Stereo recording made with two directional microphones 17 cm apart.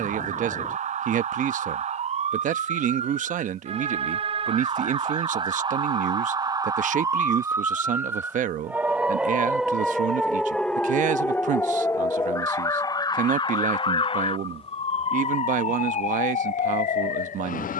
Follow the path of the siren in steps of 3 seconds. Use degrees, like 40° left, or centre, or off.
40° right, 30° right, 20° right, centre, 30° left, 40° left.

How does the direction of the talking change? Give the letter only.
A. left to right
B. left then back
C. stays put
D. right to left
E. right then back
C.